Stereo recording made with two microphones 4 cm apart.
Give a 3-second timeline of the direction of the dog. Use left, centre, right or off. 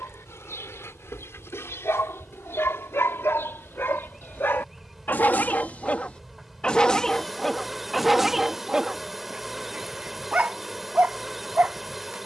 left, left, centre, right.